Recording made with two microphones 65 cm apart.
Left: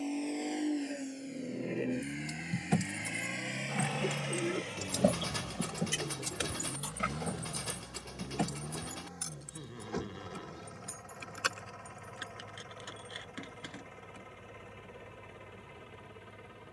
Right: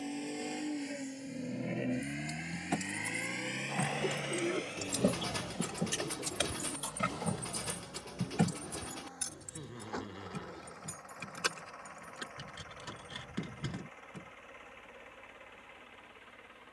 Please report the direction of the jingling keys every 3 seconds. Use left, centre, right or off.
left, left, right, right, right, off.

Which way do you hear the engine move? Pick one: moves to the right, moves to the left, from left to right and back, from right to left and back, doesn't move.
moves to the left.